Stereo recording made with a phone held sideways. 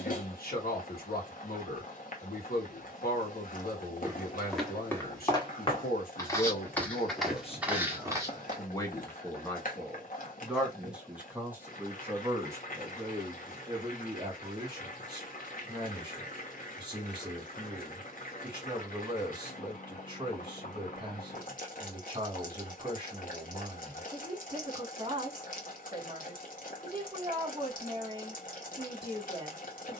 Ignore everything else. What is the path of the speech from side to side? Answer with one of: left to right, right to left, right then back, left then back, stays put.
left to right.